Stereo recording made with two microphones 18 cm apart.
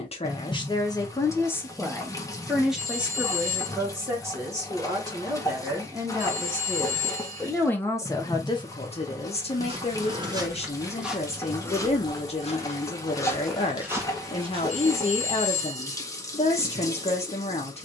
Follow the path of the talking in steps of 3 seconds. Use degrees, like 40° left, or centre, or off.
20° left, 10° right, 10° left, 40° left, 40° left, 40° left.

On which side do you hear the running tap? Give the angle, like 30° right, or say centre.
20° left.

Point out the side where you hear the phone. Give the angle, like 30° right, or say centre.
50° right.